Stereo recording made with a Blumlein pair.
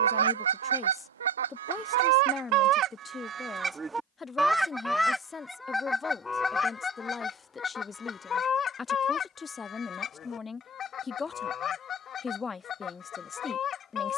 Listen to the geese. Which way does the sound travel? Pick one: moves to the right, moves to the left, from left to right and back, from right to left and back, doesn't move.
moves to the left.